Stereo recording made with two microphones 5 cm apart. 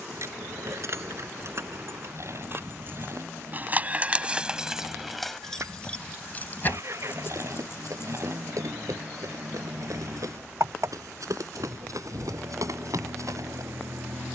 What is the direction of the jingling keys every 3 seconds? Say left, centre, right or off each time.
right, centre, left, off, off.